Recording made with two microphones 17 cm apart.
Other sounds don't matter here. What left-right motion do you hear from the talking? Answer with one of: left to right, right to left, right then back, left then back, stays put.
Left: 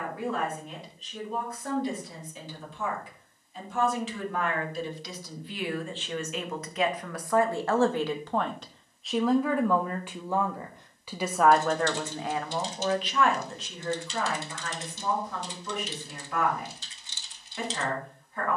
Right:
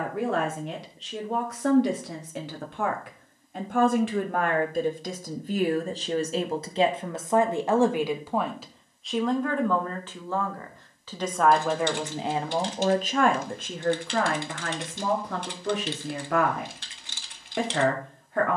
left then back.